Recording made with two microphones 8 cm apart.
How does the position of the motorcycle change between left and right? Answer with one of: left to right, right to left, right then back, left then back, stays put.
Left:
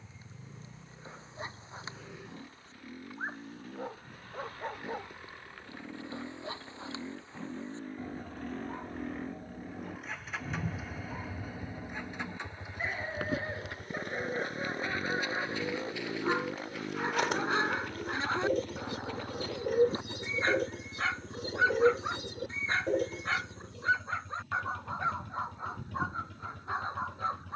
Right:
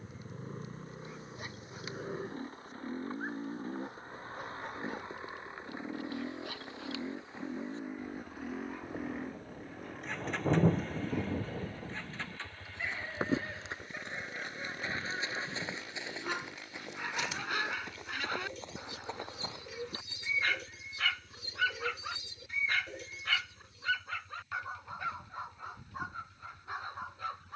right to left.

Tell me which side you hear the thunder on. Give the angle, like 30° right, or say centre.
80° right.